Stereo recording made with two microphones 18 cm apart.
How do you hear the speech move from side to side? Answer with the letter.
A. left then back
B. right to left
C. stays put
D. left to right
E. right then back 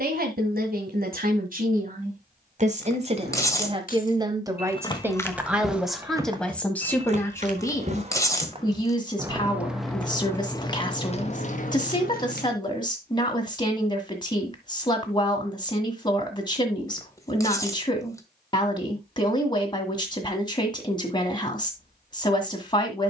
B.